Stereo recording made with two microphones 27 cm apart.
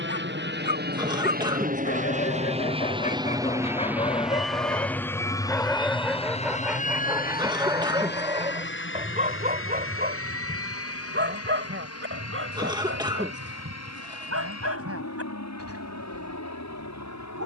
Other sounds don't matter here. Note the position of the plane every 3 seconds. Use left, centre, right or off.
right, centre, left, left, left, left.